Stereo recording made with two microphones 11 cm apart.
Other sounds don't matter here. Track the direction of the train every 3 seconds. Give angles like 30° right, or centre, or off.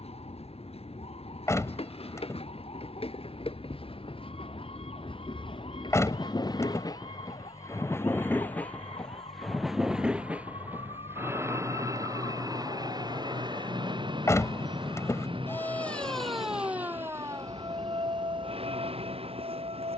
70° left, 60° left, 30° left, 10° right, 40° right, 60° right, 60° right.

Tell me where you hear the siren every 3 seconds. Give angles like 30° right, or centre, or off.
80° left, 80° left, 70° left, 70° left, 50° left, 10° right, 50° right.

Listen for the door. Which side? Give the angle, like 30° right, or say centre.
30° left.